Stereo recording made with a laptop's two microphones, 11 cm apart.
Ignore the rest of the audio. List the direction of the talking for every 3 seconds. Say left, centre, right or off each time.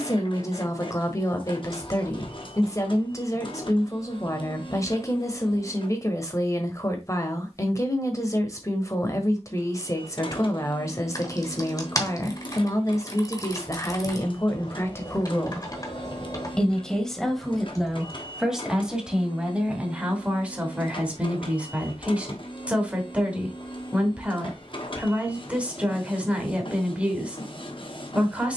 left, left, left, left, left, centre, centre, centre, centre, centre.